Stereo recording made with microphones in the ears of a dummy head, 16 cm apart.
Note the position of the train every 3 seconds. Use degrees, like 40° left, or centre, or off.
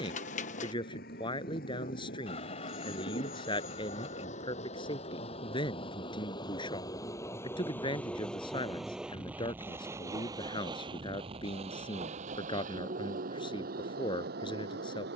50° left, 40° left, 10° left, 20° right, 50° right.